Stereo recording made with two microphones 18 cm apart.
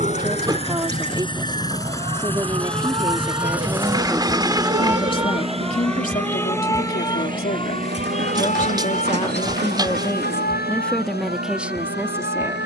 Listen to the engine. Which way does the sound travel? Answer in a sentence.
You can hear the engine travel towards the right.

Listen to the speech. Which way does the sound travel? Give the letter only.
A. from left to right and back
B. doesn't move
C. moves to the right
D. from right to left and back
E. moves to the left
D.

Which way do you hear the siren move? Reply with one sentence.
In this clip you hear the siren go from the right side to the left.